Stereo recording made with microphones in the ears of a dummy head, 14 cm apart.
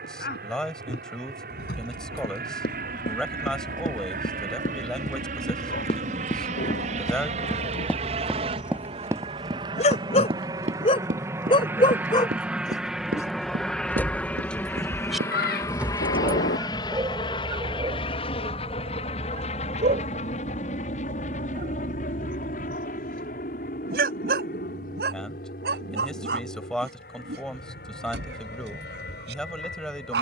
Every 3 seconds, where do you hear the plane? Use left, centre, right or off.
right, right, right, right, centre, left, left, left, left, left.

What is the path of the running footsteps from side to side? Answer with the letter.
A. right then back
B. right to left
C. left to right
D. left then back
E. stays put
C.